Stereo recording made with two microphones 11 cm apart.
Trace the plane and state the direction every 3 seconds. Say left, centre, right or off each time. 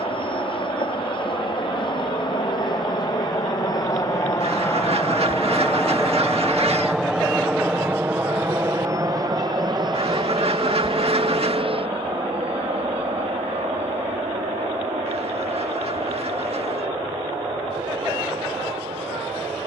left, left, centre, right, right, right, right.